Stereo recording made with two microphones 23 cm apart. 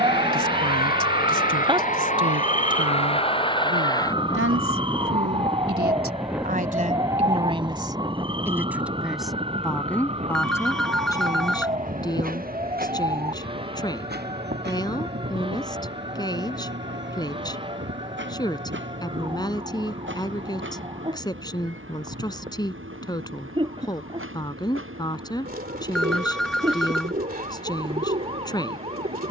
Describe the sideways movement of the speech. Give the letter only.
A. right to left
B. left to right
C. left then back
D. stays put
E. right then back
A.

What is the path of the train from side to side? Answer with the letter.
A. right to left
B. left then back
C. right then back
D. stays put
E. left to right
E.